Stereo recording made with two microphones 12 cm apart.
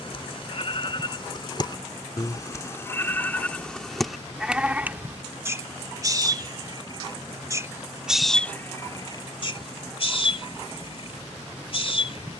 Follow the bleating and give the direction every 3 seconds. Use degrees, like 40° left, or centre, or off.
40° left, centre, 10° right, 50° left.